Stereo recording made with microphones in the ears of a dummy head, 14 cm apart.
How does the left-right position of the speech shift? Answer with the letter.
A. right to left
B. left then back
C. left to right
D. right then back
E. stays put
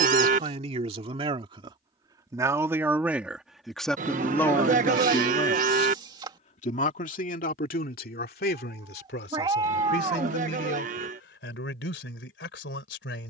A.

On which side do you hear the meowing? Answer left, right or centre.
right.